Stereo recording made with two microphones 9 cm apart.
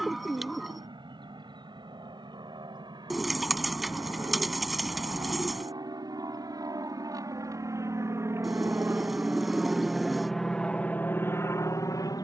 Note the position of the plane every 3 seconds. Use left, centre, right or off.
right, right, right, centre.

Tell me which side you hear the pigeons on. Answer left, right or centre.
centre.